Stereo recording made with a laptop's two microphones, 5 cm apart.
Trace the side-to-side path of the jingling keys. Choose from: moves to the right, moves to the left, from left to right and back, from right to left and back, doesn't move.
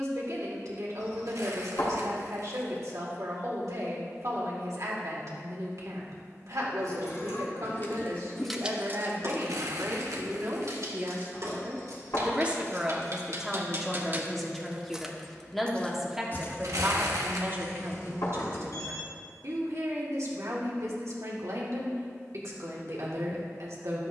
from left to right and back.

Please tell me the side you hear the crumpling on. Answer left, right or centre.
right.